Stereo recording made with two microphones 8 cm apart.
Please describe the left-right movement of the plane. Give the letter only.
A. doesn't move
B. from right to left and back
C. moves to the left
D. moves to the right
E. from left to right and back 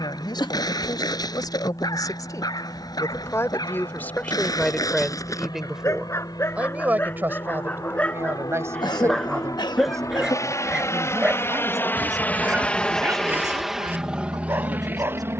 D.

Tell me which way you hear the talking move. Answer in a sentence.
In this clip you hear the talking move from left to right.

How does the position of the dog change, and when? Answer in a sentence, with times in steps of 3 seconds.
In this clip you hear the dog on the left from 0 s, in the centre from 9 s and on the right from 12 s.